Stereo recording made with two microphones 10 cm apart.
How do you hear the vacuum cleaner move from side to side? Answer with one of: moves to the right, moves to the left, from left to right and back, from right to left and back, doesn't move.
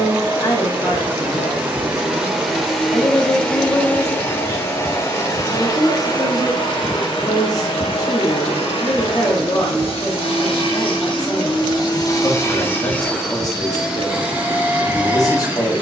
from right to left and back.